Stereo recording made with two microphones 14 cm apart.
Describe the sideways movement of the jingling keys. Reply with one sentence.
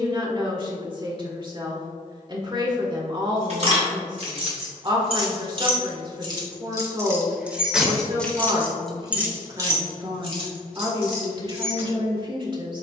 In this clip you hear the jingling keys move from right to left and back again.